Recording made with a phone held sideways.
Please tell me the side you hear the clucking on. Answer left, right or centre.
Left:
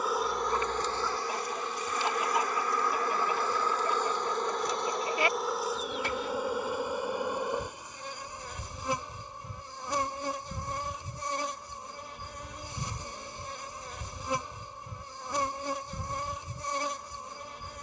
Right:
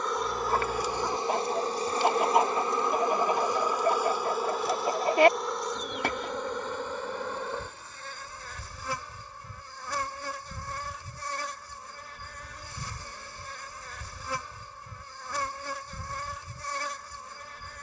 right.